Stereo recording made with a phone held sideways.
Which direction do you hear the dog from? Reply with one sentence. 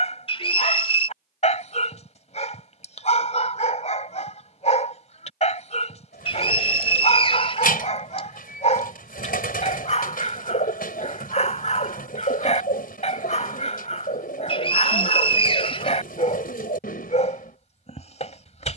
In this clip you hear the dog on the left.